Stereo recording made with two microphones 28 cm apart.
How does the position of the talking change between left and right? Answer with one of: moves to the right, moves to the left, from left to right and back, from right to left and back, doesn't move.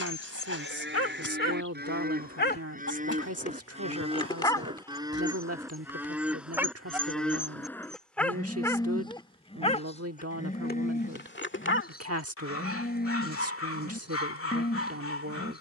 doesn't move.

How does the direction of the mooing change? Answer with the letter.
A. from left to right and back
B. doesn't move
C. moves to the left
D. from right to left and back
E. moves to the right
C.